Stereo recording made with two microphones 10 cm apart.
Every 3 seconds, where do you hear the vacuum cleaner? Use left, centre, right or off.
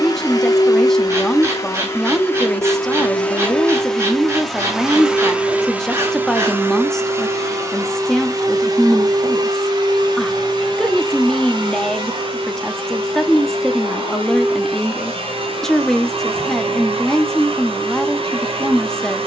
left, centre, right, right, right, right, right.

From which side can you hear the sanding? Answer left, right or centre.
right.